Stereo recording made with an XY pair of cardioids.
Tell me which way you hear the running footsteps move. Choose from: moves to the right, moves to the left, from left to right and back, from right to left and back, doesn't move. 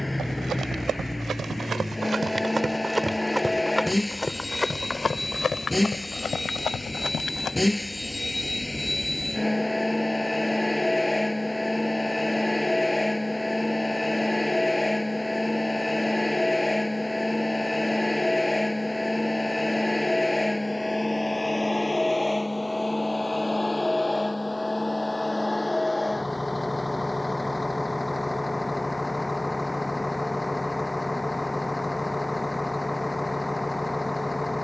moves to the left.